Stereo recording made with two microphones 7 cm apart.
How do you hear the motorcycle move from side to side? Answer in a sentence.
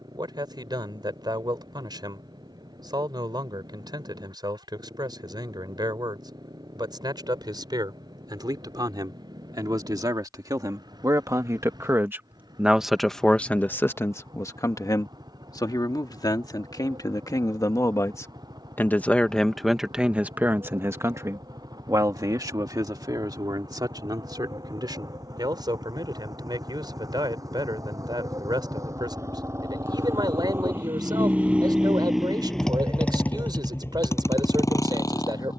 You can hear the motorcycle go from the right side to the left.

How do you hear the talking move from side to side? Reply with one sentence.
You can hear the talking go left and come back.